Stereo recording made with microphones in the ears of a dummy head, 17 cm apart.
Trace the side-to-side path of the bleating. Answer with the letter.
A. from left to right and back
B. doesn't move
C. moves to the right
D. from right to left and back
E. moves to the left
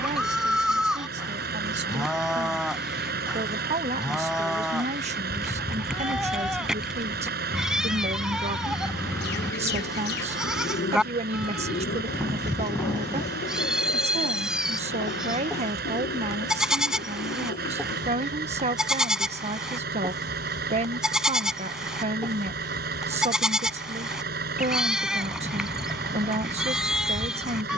B.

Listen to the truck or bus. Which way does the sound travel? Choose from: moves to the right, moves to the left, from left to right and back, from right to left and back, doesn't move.
doesn't move.